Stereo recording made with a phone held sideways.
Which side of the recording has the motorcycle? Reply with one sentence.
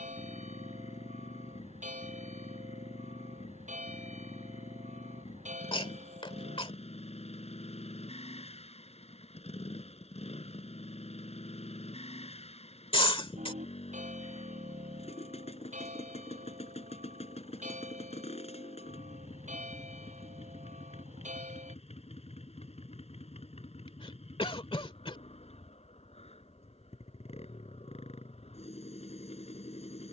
In this clip you hear the motorcycle on the left.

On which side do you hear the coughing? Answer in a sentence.
In this clip you hear the coughing on the left.